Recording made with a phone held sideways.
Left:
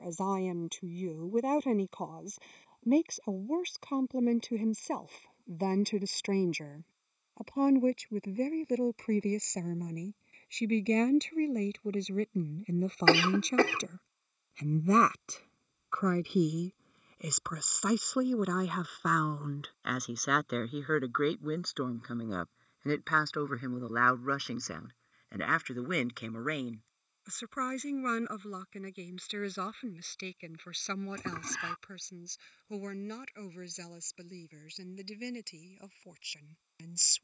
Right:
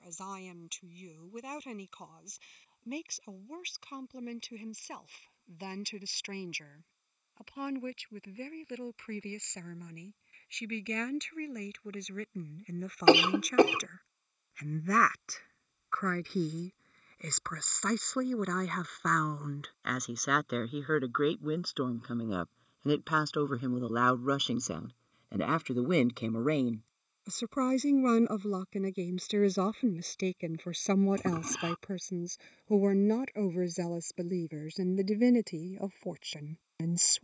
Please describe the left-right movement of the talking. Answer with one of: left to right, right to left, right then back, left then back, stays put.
left to right.